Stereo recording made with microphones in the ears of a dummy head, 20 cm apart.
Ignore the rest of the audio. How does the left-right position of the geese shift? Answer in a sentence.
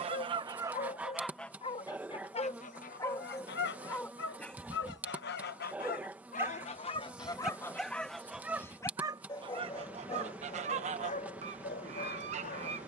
In this clip you hear the geese go left and come back.